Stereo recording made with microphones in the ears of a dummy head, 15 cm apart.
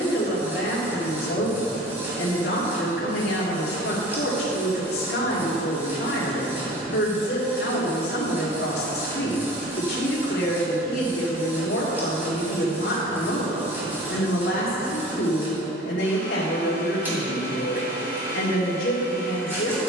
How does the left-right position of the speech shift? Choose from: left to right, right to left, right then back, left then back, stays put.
stays put.